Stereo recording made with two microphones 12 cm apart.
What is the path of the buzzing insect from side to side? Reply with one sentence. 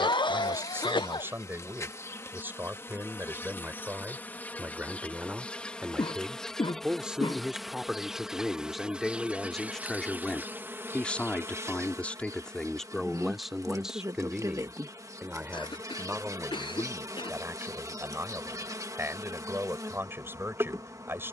In this clip you hear the buzzing insect move to the right.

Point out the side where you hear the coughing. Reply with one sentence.
In this clip you hear the coughing on the left.